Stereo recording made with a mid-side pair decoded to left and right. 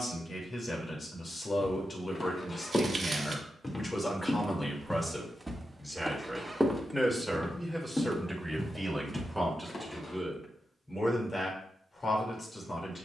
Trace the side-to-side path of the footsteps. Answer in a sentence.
You can hear the footsteps go right and come back.